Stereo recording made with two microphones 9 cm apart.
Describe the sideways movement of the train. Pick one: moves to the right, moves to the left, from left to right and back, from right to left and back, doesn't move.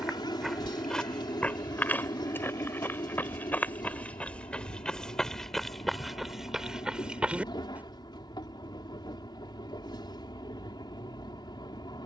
doesn't move.